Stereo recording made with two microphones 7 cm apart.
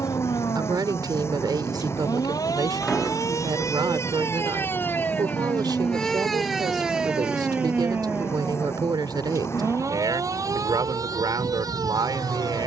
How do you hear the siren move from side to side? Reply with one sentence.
In this clip you hear the siren move from left to right.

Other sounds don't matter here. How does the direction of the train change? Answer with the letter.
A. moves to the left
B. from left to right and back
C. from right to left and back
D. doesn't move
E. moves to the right
D.